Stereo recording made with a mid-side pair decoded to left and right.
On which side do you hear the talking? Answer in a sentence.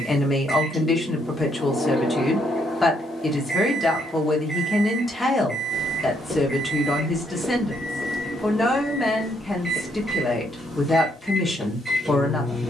In this clip you hear the talking in the centre.